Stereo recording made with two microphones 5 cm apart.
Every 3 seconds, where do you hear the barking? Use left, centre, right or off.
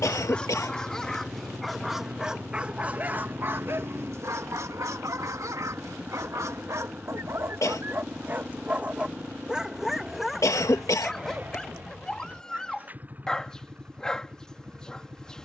centre, right, right, centre, centre.